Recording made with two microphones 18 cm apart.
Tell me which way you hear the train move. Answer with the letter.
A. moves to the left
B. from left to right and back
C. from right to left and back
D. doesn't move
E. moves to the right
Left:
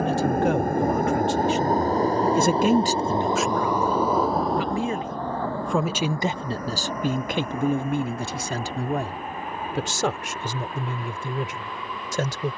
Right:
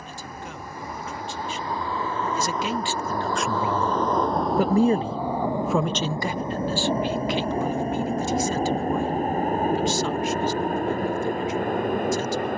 E.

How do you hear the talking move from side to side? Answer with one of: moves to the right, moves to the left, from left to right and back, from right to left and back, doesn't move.
from left to right and back.